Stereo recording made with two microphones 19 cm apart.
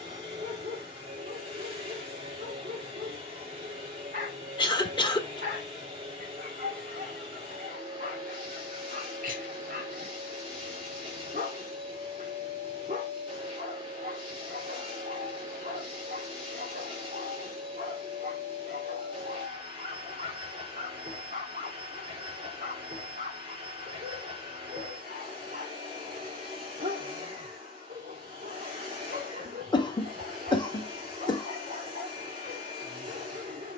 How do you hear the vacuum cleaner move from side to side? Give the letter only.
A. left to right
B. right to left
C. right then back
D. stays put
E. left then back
D.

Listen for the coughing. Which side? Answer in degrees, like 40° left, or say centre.
20° left.